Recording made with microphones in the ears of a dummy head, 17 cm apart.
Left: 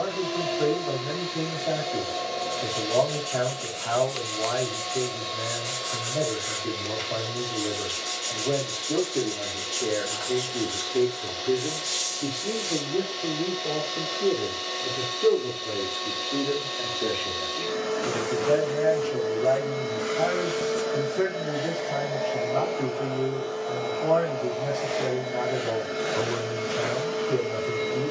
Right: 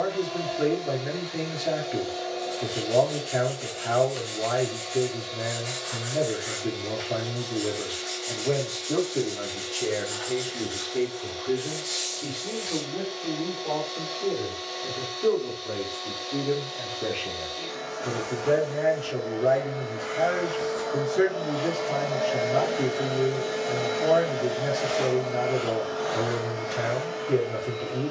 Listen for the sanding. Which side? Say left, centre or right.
left.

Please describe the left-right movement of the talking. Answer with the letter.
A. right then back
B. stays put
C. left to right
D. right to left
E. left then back
E.